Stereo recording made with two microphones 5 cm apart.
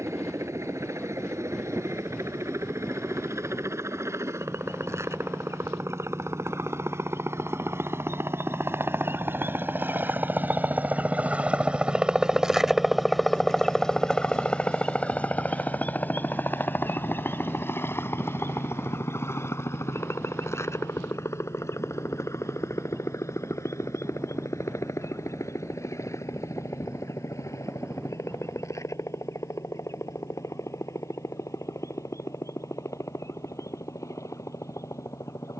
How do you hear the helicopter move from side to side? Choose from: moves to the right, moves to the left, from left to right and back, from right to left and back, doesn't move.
moves to the left.